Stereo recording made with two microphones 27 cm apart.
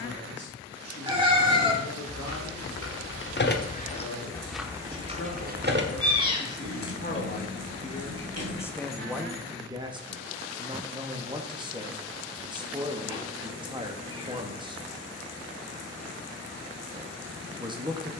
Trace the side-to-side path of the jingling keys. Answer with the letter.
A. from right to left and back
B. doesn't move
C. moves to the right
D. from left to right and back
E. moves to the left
C.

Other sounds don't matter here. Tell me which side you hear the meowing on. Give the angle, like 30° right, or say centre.
20° right.